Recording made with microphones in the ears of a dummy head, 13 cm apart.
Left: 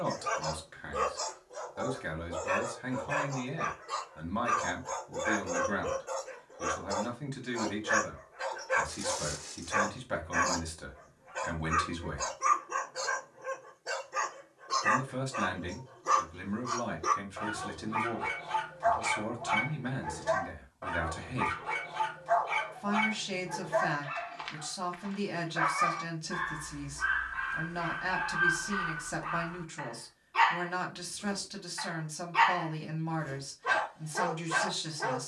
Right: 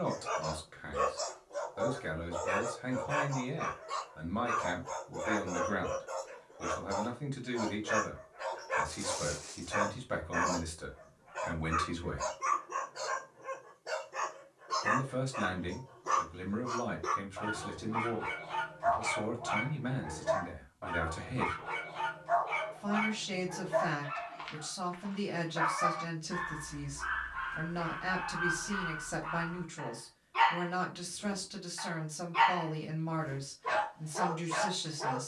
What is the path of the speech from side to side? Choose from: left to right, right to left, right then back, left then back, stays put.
stays put.